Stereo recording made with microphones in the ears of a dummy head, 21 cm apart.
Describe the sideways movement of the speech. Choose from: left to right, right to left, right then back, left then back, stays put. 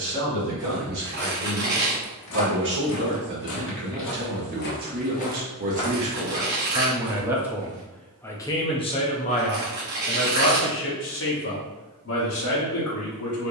right to left.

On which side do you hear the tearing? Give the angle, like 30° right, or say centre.
50° right.